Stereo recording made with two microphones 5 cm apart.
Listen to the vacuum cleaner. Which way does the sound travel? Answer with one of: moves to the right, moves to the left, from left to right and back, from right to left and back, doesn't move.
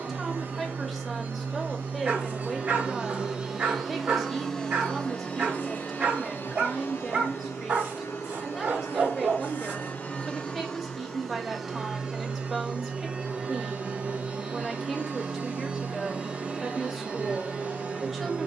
from right to left and back.